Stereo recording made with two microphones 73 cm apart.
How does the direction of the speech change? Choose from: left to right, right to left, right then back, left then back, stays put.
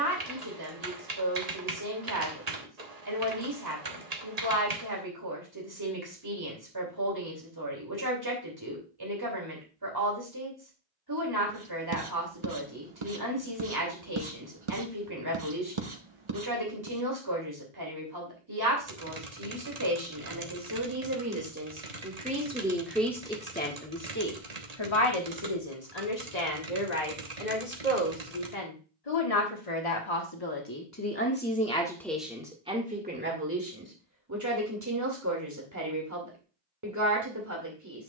left then back.